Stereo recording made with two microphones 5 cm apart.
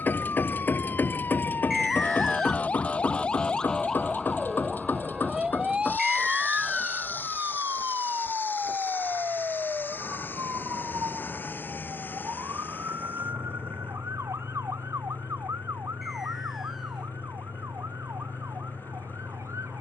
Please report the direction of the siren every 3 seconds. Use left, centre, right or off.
left, centre, right, right, right, right, right.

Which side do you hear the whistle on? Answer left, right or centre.
centre.